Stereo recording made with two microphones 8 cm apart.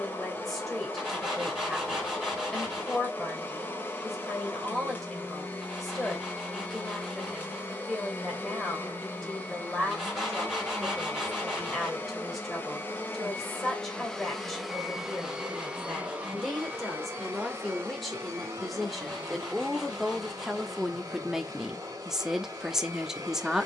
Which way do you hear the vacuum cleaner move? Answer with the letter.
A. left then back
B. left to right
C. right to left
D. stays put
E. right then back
B.